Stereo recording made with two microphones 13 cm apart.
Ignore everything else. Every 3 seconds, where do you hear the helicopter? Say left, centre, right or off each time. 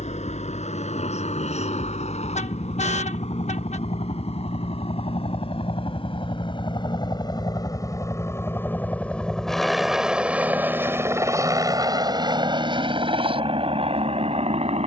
left, left, left, centre, right.